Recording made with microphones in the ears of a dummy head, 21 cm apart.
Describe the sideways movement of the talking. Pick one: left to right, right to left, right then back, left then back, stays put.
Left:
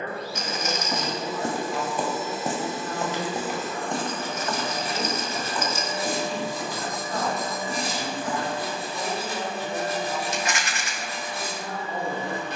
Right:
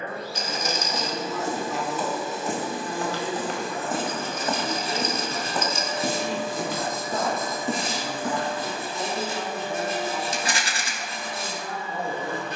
right then back.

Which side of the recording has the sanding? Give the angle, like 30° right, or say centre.
20° right.